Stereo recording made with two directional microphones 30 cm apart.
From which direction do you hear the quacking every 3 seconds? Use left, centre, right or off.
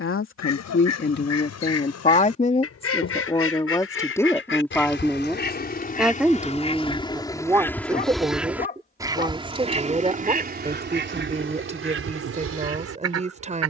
left, left, centre, right, right.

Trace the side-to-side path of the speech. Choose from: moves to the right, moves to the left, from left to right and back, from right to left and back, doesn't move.
moves to the right.